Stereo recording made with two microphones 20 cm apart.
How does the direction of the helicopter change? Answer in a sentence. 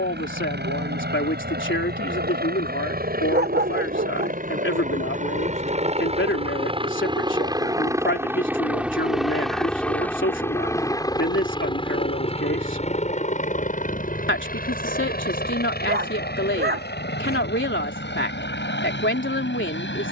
You can hear the helicopter travel towards the left.